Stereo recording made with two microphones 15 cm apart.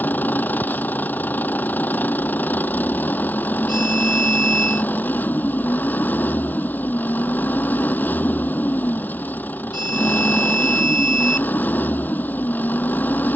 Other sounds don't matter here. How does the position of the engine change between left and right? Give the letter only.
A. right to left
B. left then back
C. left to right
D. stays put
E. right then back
D.